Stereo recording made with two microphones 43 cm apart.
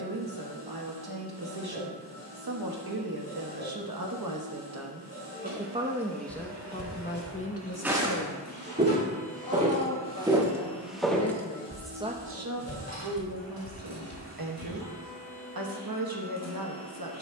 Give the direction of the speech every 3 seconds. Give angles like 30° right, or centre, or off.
60° right, 40° right, 20° left, 40° left, 50° right, 50° right.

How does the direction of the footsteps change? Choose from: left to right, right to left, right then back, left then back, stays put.
right then back.